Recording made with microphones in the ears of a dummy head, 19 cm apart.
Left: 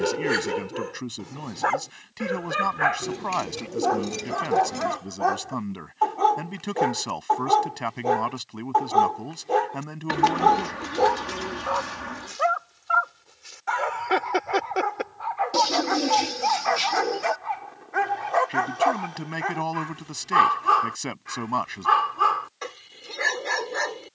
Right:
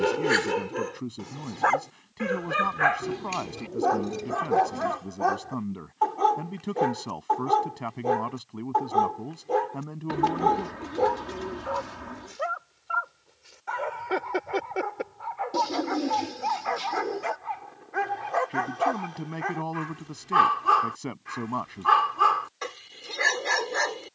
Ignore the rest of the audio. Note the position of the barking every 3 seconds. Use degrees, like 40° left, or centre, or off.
10° right, centre, 20° left, 40° left, 50° left, 30° left, 10° left, 10° right.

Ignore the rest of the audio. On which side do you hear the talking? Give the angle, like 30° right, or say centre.
60° left.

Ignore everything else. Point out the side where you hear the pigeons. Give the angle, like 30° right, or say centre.
60° left.